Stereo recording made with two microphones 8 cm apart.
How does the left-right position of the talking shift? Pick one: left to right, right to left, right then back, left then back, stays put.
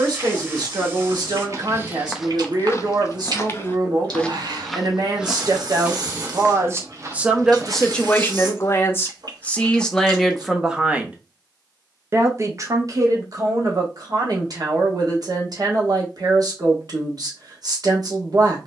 left then back.